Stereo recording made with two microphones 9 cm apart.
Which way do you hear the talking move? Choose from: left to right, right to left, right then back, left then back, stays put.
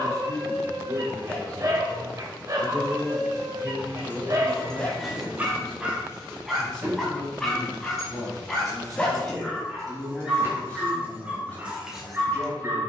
right to left.